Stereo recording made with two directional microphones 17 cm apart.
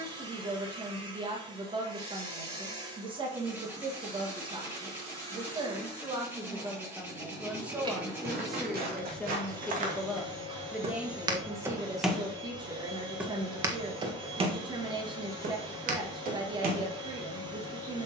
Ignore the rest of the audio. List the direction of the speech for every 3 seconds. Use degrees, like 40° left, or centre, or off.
30° right, 30° right, 10° right, centre, 30° right, 30° right.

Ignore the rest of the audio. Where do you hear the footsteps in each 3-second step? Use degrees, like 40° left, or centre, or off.
off, off, 60° right, 40° right, 20° right, 60° right.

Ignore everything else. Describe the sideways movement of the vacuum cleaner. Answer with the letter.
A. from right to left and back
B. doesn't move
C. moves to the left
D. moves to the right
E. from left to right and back
B.